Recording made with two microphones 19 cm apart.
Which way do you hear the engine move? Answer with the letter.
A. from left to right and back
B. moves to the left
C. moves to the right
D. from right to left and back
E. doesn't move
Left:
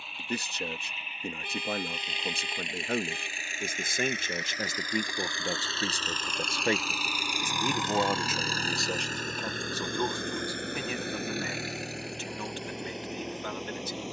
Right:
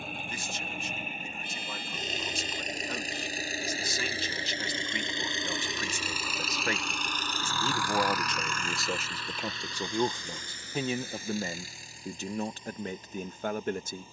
B.